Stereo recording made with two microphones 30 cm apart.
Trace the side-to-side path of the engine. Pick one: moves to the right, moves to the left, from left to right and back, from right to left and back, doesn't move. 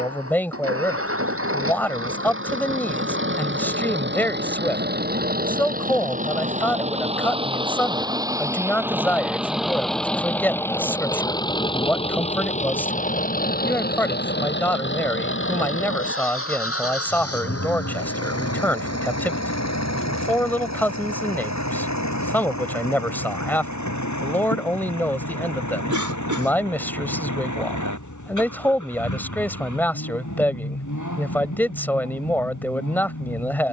moves to the left.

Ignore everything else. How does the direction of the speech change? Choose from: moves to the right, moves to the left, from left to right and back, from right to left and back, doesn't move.
doesn't move.